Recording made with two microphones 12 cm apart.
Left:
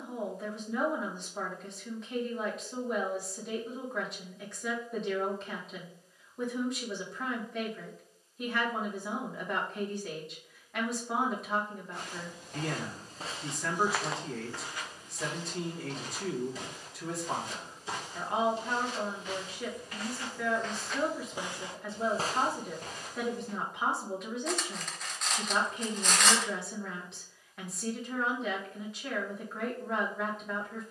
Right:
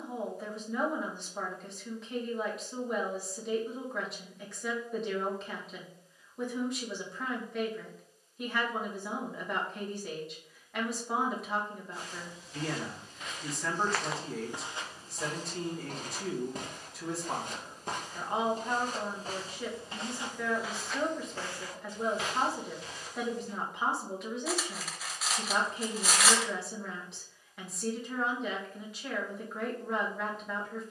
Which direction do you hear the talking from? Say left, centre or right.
centre.